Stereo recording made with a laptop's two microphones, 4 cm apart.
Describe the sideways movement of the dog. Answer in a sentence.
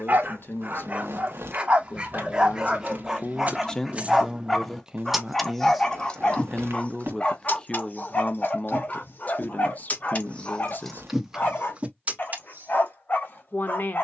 In this clip you hear the dog move to the left.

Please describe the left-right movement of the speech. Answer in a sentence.
In this clip you hear the speech move from left to right and back again.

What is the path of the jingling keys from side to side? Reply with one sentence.
You can hear the jingling keys go left and come back.